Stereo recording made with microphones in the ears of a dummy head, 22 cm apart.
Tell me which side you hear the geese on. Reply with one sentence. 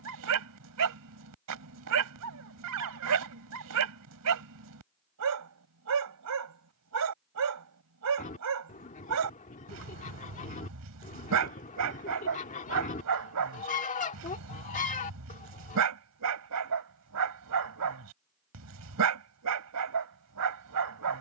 In this clip you hear the geese on the left.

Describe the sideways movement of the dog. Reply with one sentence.
In this clip you hear the dog stay put.